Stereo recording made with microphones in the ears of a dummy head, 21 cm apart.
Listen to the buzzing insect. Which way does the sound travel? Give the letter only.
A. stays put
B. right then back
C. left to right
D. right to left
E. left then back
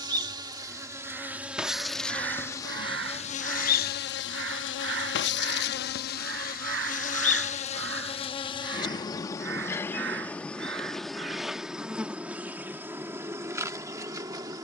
E.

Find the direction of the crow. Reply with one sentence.
In this clip you hear the crow on the right.